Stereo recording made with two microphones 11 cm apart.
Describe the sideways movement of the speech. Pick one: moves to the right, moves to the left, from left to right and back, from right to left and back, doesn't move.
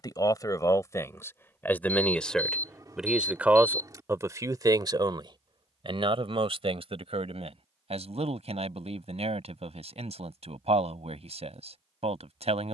moves to the right.